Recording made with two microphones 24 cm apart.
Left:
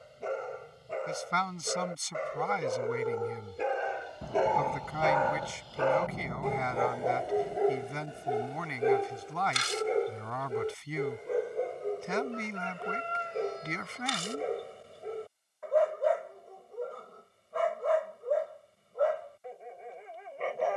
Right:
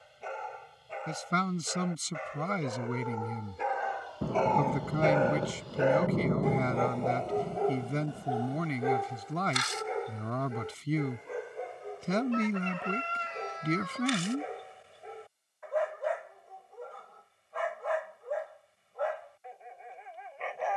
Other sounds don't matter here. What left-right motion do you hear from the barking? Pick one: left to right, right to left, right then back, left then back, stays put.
right then back.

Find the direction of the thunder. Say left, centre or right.
right.